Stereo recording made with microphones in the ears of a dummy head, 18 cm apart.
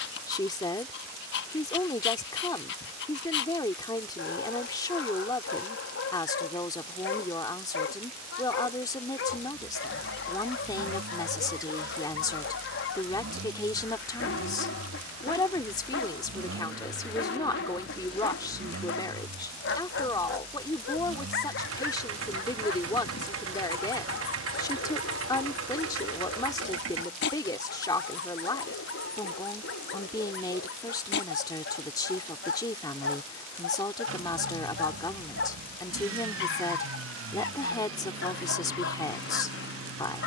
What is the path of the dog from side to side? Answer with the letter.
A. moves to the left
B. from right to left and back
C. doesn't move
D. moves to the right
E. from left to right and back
C.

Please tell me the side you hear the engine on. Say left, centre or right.
right.